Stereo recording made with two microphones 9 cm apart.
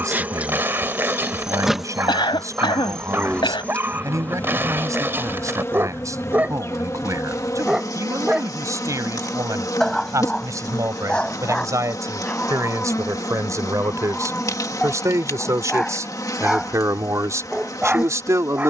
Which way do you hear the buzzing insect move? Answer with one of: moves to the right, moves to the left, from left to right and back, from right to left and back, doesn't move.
moves to the left.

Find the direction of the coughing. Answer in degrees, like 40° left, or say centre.
70° left.